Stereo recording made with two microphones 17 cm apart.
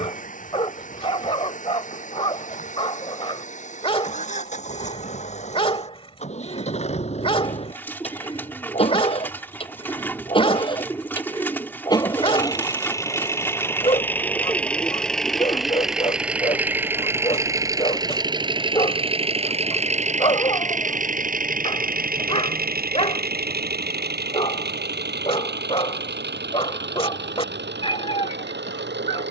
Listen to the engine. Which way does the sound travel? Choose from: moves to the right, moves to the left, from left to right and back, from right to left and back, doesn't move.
moves to the right.